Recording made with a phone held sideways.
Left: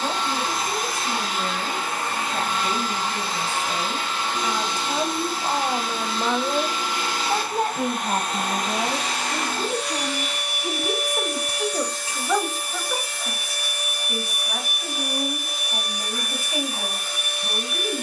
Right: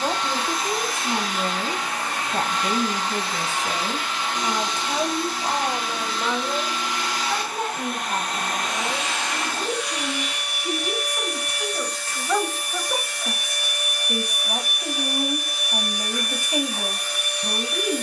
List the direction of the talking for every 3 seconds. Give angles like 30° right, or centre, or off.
30° right, 10° right, 40° left, 50° left, 10° right, 20° right.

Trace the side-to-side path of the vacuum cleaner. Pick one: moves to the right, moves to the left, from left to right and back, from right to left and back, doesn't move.
doesn't move.